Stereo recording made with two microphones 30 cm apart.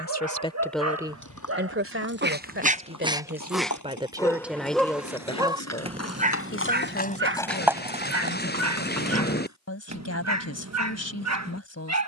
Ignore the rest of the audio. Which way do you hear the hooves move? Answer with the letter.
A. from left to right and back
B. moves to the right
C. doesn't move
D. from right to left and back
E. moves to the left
B.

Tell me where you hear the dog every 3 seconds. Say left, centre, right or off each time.
right, centre, right, right.